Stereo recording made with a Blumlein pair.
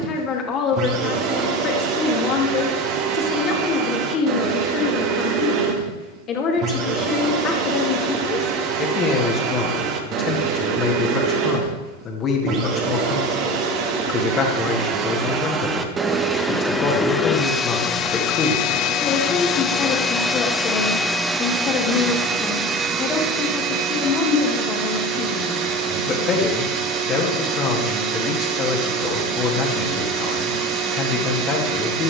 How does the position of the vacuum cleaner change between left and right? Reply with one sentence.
You can hear the vacuum cleaner go left and come back.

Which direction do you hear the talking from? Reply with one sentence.
In this clip you hear the talking on the left.